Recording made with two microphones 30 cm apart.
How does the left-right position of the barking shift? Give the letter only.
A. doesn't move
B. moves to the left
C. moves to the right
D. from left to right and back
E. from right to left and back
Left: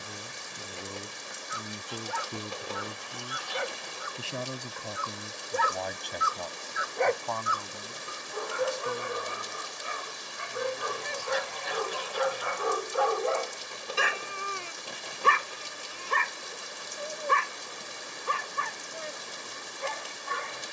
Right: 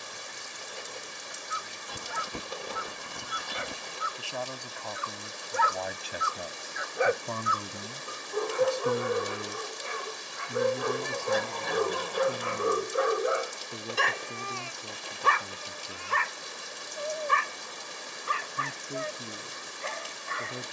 D.